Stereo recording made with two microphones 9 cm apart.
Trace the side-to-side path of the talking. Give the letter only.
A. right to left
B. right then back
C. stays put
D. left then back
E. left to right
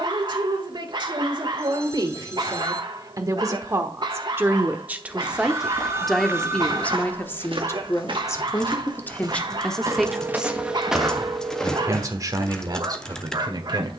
D.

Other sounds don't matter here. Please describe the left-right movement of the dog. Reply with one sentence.
In this clip you hear the dog stay put.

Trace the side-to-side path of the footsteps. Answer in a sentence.
You can hear the footsteps go right and come back.